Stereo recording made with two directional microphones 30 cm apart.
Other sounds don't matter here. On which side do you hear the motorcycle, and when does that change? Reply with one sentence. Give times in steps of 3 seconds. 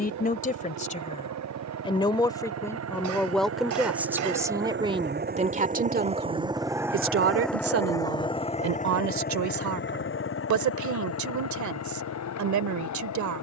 In this clip you hear the motorcycle on the right from 0 s, in the centre from 6 s and on the left from 9 s.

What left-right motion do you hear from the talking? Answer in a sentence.
You can hear the talking travel towards the right.